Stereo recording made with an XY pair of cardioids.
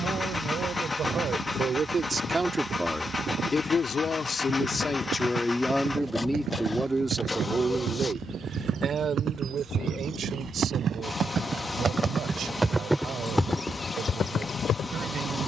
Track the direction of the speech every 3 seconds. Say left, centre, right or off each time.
right, left, right, right, right.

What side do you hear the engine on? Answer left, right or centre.
left.